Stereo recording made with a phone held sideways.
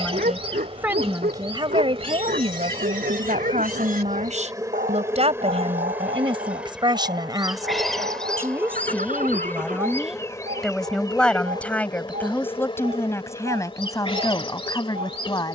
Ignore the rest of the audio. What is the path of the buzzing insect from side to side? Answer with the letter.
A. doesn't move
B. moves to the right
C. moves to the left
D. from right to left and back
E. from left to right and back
C.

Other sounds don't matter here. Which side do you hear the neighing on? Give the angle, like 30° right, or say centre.
70° right.